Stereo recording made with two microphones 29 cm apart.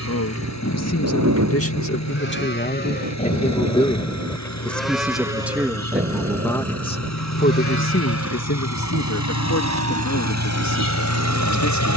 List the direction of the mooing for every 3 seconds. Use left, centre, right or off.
left, centre, right, right.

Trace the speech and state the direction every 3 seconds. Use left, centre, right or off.
left, centre, left, left.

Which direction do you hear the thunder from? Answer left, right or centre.
right.